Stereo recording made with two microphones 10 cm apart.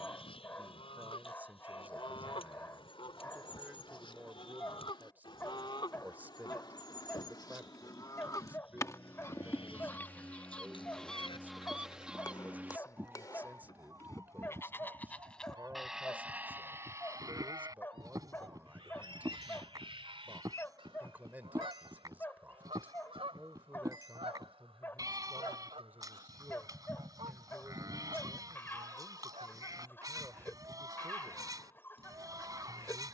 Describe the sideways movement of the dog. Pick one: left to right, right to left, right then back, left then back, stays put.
stays put.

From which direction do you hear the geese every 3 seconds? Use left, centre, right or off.
left, left, left, centre, right, right, right, right, right, right, right.